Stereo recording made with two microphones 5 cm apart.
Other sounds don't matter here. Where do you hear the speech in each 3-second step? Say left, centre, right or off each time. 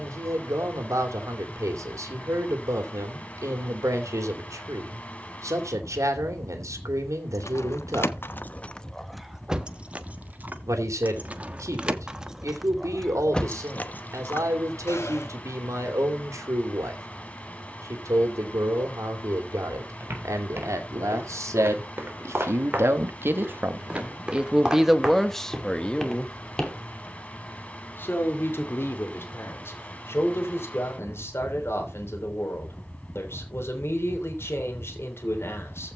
right, right, right, right, right, right, right, right, centre, left, left, left.